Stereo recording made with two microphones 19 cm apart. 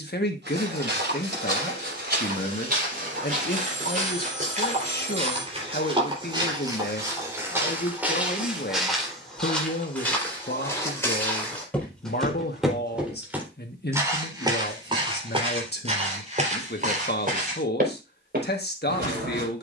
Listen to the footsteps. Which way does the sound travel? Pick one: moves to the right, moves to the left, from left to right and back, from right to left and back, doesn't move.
from right to left and back.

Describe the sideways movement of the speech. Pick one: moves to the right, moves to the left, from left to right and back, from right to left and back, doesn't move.
doesn't move.